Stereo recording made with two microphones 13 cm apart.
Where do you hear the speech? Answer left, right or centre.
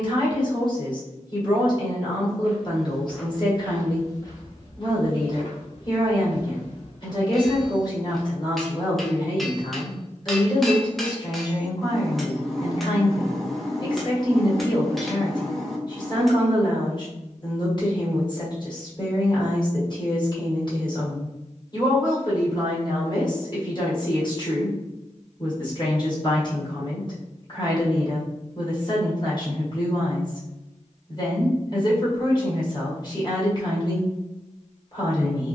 left.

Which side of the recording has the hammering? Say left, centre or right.
centre.